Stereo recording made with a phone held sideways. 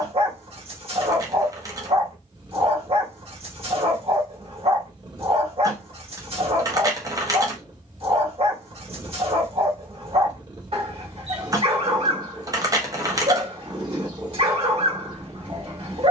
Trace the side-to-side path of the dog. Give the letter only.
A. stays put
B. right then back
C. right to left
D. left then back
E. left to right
A.